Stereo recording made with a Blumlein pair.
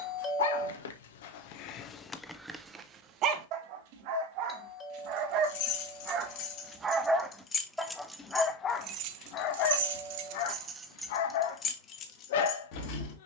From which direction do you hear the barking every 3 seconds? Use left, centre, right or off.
left, right, centre, left, left.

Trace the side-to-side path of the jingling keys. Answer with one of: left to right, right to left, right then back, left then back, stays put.
right then back.